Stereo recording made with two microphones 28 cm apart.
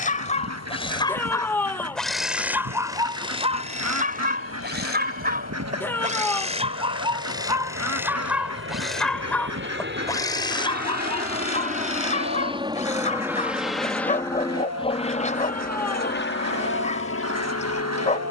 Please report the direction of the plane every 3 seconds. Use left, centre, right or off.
right, right, right, right, centre, left.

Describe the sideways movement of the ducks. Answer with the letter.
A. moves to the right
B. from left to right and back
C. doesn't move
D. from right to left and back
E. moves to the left
C.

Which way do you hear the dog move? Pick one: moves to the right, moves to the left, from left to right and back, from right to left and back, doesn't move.
from left to right and back.